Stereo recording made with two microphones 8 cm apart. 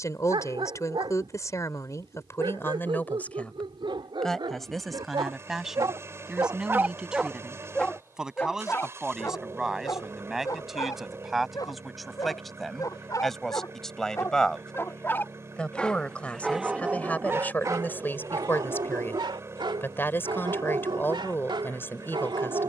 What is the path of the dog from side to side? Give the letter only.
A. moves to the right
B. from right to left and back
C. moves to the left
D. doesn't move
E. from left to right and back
B.